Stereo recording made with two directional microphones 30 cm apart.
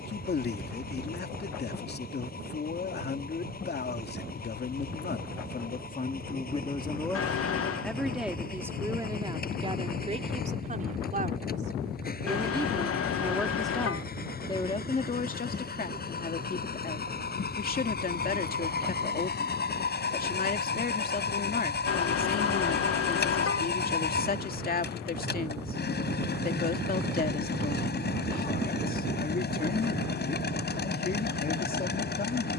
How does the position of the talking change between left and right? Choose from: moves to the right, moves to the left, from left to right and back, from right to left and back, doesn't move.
from left to right and back.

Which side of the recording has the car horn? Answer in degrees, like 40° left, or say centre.
50° left.